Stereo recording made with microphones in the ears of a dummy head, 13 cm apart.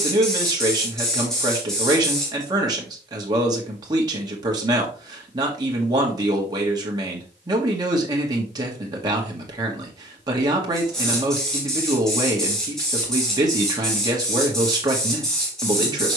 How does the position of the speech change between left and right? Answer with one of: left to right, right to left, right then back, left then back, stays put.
stays put.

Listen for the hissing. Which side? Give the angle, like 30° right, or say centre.
centre.